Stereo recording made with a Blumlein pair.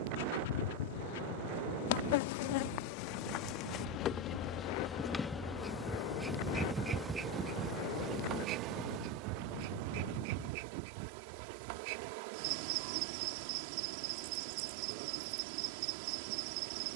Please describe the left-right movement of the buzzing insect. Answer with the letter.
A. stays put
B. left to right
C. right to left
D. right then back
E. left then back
B.